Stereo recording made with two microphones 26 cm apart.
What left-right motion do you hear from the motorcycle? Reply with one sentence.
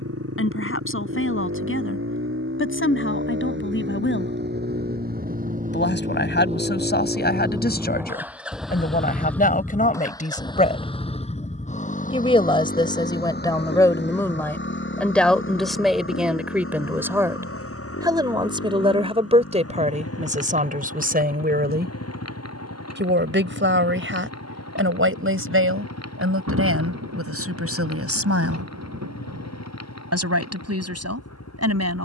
You can hear the motorcycle go from the right side to the left.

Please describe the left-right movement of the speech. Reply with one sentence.
You can hear the speech move from left to right.